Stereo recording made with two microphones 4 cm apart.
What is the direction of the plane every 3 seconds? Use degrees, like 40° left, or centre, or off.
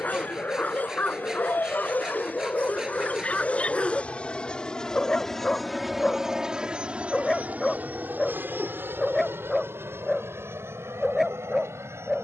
50° left, 20° left, 30° right, 60° right.